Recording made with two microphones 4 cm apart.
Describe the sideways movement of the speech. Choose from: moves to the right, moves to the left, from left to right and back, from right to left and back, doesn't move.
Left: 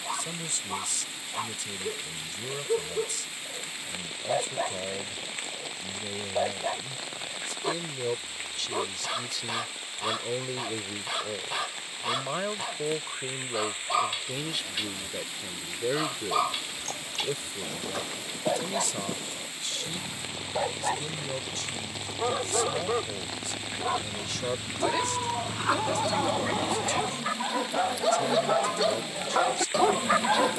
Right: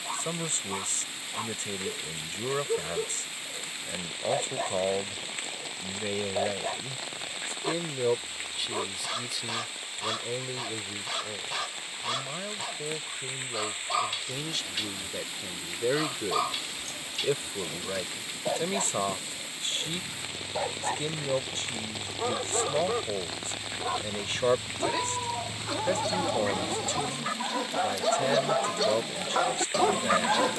from right to left and back.